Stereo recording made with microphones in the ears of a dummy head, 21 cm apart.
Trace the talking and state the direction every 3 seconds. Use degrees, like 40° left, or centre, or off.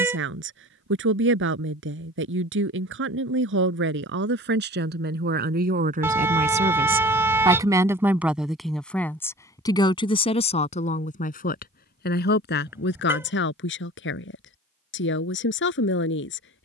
60° right, 50° right, 20° right, 30° left, 50° left, 60° left.